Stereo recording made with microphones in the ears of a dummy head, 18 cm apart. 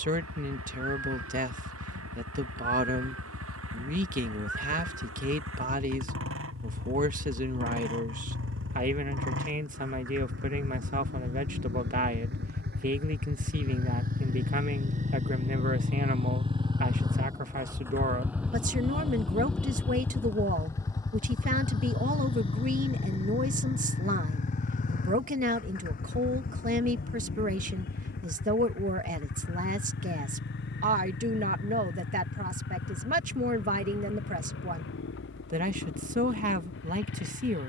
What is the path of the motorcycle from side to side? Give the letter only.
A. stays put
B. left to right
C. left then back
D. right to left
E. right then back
D.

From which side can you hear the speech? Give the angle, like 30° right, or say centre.
40° right.